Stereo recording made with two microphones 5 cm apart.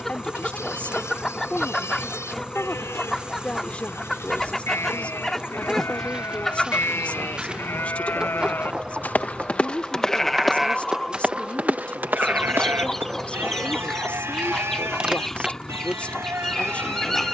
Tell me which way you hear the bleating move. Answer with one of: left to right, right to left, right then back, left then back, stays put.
left to right.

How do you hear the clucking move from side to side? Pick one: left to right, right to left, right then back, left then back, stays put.
stays put.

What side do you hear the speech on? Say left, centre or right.
left.